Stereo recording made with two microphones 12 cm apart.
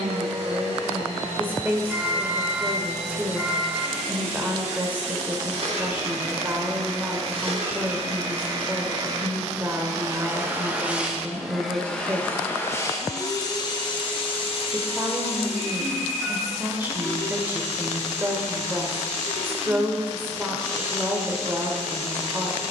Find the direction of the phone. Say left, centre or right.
centre.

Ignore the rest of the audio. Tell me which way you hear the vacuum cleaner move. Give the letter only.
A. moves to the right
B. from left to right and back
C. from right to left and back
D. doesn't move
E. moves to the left
E.